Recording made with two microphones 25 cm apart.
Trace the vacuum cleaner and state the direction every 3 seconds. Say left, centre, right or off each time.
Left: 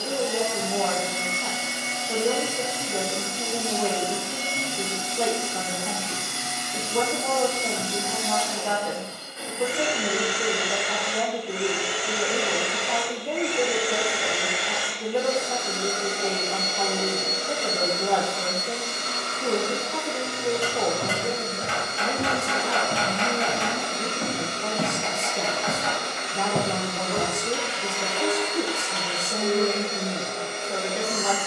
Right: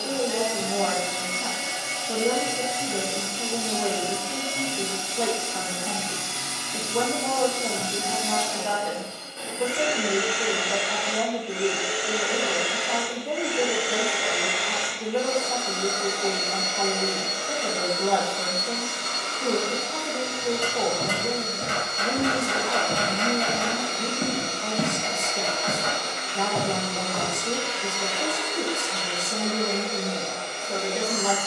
right, right, right, right, centre, left, left, left, left, left, left.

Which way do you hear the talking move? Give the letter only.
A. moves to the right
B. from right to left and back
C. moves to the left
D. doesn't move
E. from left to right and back
D.